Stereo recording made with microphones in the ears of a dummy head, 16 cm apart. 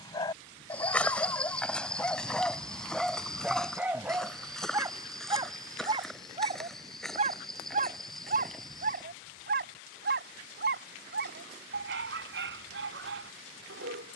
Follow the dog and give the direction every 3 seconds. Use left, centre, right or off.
centre, centre, right, right, right.